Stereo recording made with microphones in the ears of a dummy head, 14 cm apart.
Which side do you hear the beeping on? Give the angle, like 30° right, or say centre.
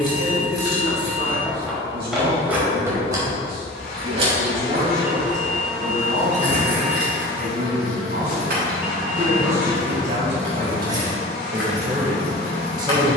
10° right.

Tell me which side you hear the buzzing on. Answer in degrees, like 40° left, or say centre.
70° left.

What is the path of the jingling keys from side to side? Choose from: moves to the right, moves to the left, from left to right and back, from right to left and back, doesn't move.
from left to right and back.